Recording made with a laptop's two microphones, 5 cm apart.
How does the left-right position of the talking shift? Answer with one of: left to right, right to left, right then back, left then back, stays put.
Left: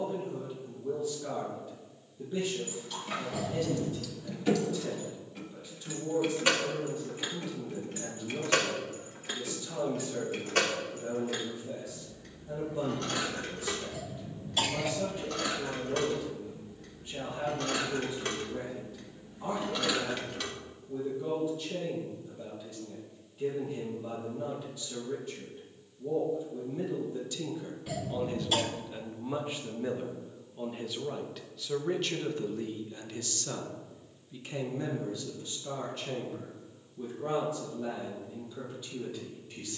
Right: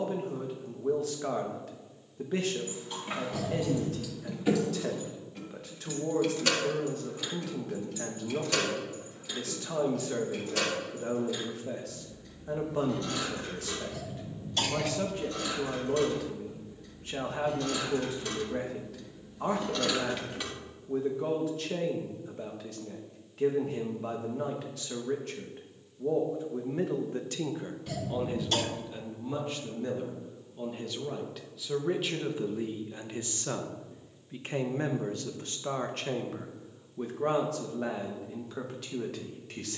left then back.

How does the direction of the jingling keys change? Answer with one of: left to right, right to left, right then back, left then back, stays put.
left then back.